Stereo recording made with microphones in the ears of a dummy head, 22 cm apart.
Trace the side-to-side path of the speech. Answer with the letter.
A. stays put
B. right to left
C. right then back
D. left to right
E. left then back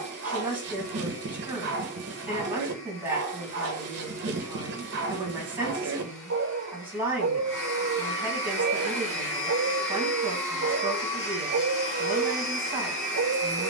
A.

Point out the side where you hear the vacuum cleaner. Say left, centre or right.
left.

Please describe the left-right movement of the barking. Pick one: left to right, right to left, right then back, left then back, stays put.
stays put.